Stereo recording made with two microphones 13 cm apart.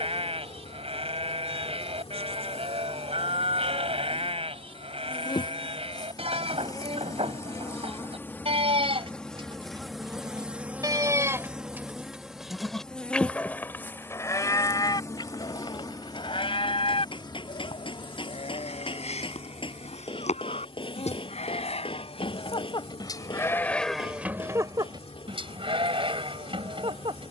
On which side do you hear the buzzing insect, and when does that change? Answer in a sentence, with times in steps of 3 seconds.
In this clip you hear the buzzing insect on the left from 0 s, in the centre from 9 s and on the left from 15 s.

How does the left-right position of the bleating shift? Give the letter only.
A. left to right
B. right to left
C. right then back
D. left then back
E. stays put
D.